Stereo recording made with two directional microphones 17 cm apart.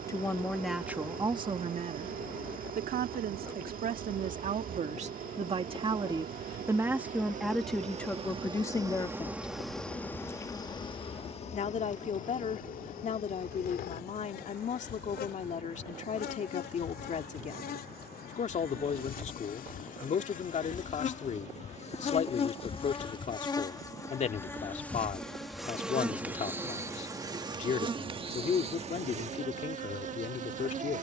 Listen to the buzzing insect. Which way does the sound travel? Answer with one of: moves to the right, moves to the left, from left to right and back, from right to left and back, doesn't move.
from right to left and back.